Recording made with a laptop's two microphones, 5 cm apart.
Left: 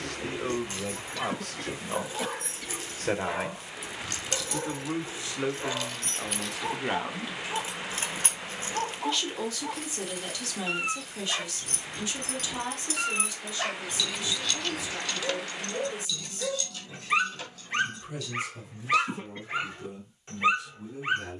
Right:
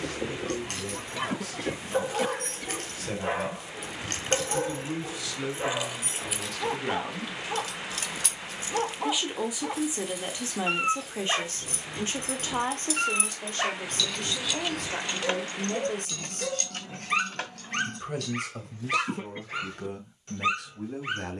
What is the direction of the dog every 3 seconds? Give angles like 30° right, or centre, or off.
40° right, 40° right, 40° right, 40° right, 20° right, centre, 20° left.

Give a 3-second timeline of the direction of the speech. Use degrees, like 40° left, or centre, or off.
50° left, 40° left, 20° left, 20° right, 50° right, 60° right, 70° right.